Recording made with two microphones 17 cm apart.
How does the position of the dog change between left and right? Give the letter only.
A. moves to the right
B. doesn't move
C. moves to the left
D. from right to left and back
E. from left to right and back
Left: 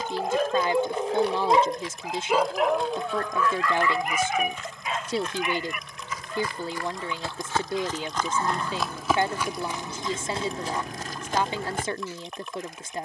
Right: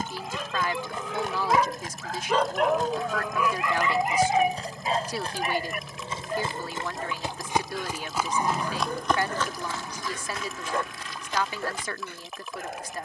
A.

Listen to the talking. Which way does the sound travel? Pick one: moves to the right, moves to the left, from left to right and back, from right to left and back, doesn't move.
doesn't move.